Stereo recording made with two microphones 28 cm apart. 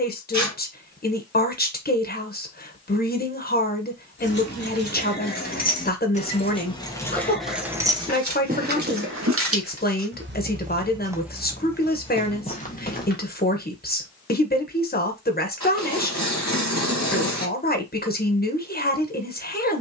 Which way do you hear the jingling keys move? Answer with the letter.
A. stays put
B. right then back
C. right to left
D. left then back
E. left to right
E.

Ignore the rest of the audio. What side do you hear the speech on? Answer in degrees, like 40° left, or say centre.
30° left.